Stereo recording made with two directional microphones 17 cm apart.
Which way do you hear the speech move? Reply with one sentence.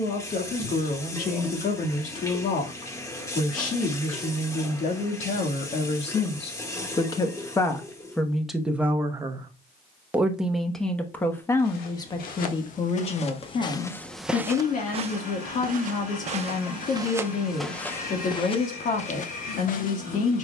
You can hear the speech go right and come back.